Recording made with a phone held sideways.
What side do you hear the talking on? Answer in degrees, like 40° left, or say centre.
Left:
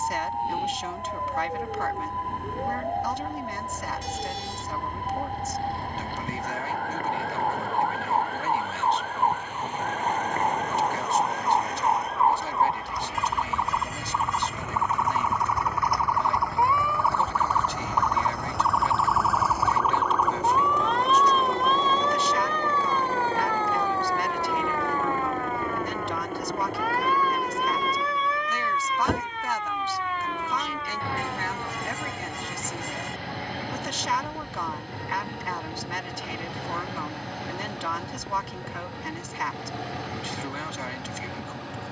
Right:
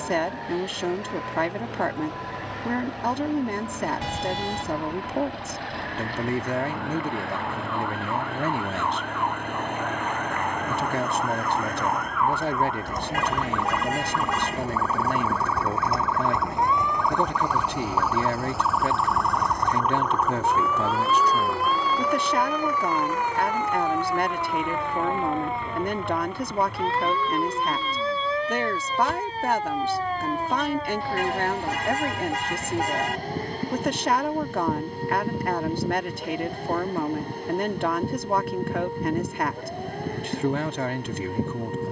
50° right.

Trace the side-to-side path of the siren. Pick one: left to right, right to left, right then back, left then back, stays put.
left to right.